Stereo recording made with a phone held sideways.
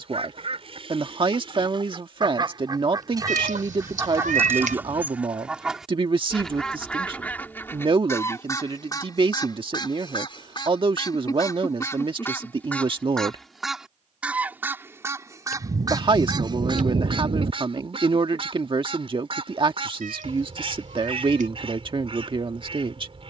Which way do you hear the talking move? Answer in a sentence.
You can hear the talking stay put.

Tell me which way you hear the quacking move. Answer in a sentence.
In this clip you hear the quacking move from right to left and back again.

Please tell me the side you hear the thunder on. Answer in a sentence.
In this clip you hear the thunder on the right.